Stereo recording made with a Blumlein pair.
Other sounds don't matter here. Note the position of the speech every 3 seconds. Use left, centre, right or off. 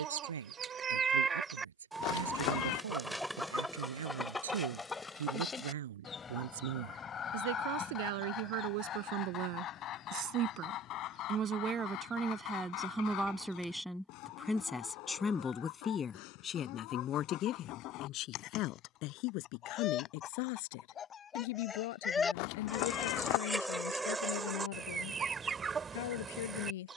right, right, right, right, centre, left, left, left, left.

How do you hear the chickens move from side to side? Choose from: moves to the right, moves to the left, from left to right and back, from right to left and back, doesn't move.
from right to left and back.